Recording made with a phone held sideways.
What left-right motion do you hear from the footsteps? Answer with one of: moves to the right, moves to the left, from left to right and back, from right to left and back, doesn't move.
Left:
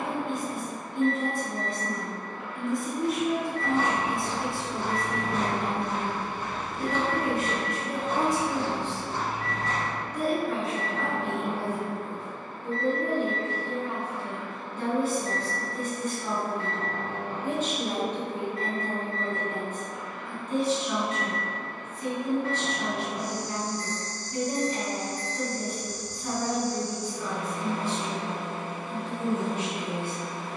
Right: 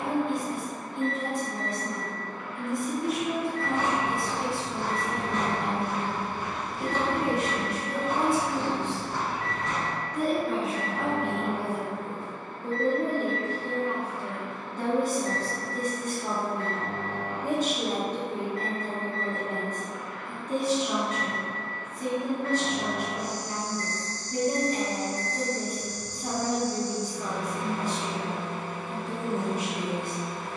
from left to right and back.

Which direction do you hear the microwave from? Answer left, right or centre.
left.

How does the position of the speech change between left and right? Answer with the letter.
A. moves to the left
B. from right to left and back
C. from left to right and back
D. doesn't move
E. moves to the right
E.